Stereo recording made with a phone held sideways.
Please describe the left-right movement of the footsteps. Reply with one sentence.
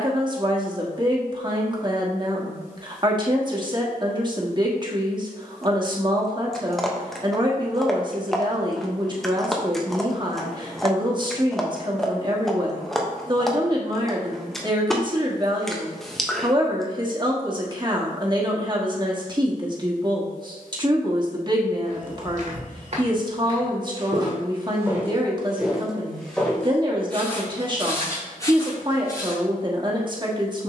You can hear the footsteps travel towards the left.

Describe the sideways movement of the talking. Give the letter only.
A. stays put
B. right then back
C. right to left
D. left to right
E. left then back
A.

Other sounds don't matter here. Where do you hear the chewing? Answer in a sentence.
In this clip you hear the chewing in the centre.